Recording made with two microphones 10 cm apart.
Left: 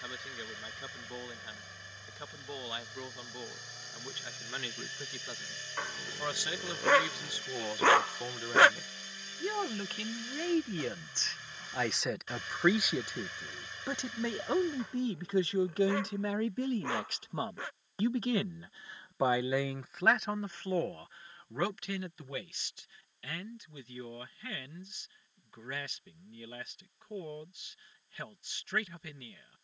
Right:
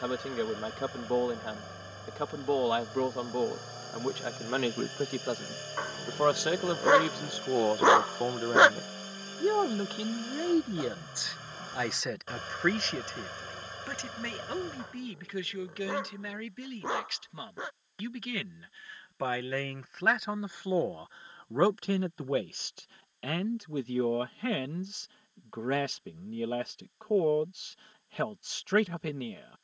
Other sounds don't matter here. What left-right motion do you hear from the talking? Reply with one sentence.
In this clip you hear the talking move from right to left and back again.